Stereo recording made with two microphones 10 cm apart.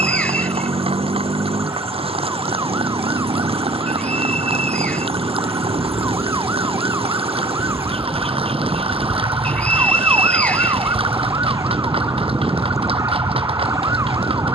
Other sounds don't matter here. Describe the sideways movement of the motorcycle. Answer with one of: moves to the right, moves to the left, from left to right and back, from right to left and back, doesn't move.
doesn't move.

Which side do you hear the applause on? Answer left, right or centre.
right.